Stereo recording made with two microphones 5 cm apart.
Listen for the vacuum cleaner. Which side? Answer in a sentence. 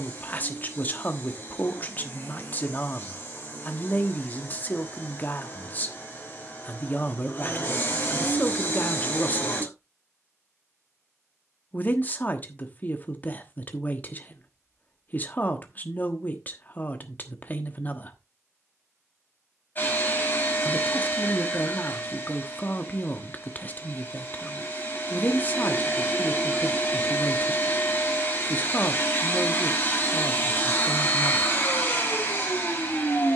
In this clip you hear the vacuum cleaner on the left.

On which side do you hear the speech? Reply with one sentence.
In this clip you hear the speech on the left.